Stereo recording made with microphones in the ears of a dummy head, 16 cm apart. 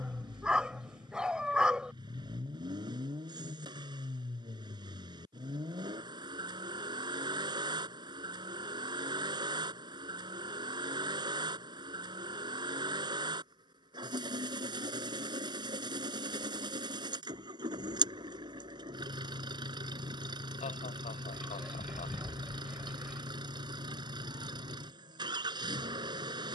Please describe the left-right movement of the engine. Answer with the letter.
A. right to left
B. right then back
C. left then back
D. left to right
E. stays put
E.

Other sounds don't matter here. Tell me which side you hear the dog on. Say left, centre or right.
centre.